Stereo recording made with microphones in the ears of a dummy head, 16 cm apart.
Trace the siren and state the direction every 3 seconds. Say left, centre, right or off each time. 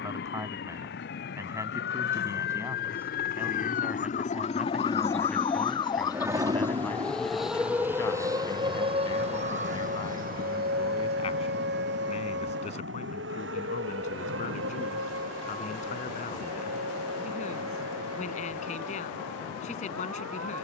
left, left, centre, right, right, right, right.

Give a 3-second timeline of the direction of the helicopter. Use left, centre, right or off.
left, left, right, right, right, right, right.